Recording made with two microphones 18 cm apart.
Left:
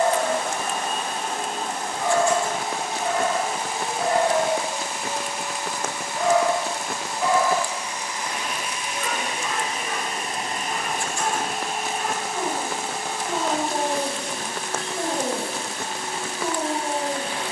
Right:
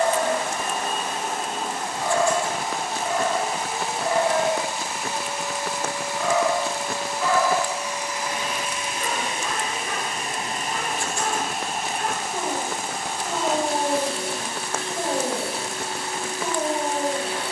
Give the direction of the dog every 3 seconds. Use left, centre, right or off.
left, left, centre, right, right, right.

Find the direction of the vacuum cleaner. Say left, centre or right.
centre.